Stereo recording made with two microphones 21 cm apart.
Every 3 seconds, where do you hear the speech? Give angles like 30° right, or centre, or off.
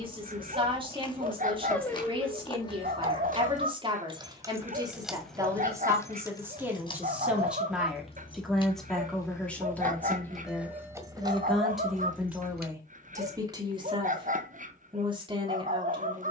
20° right, 20° right, centre, 10° left, 10° right, 20° right.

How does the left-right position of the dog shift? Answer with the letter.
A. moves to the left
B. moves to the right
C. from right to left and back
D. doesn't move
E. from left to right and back
D.